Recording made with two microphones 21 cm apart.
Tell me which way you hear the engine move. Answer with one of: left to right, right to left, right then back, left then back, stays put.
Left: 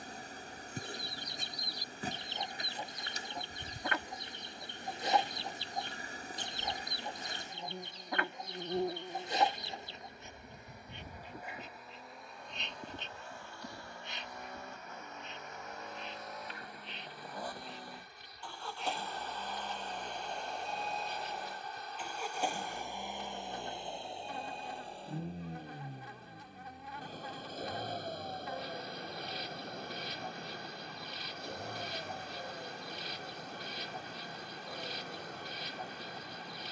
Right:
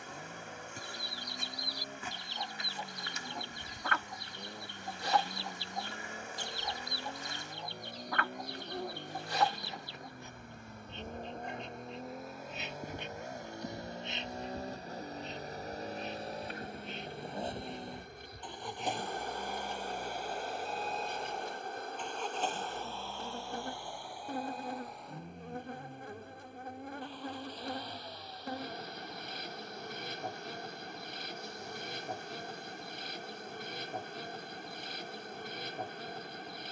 right to left.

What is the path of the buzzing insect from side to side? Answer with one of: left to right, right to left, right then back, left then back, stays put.
left to right.